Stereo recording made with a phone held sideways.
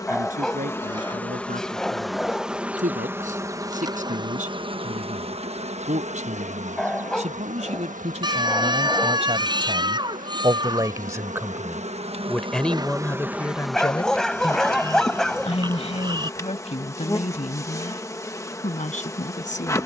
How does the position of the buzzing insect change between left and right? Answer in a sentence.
In this clip you hear the buzzing insect move from left to right and back again.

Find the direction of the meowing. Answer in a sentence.
You can hear the meowing on the right.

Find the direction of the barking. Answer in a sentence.
You can hear the barking in the centre.